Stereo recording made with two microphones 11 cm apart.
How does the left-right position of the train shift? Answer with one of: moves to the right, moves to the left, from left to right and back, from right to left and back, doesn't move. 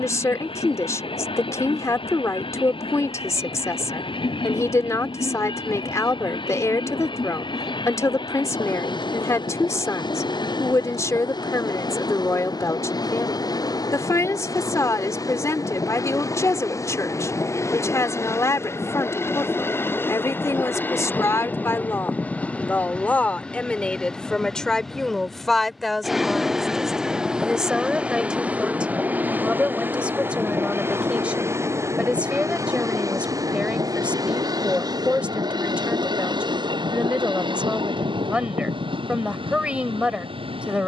moves to the right.